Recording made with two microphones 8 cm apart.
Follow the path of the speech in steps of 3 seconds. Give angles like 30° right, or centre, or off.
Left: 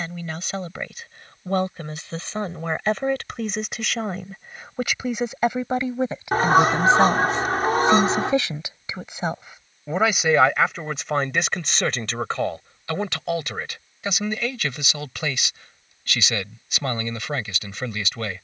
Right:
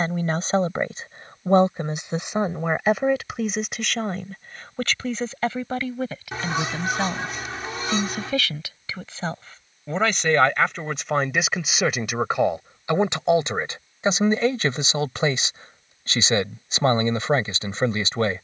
20° right, 10° left, 20° left, centre, 20° right, 30° right.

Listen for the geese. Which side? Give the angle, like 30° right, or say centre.
50° left.